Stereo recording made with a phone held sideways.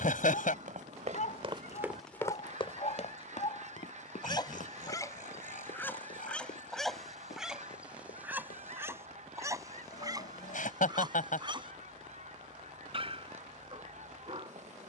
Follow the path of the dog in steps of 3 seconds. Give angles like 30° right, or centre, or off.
50° left, 30° left, 10° right, 30° right, 40° right.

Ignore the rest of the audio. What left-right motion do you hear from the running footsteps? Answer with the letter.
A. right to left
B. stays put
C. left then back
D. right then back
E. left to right
A.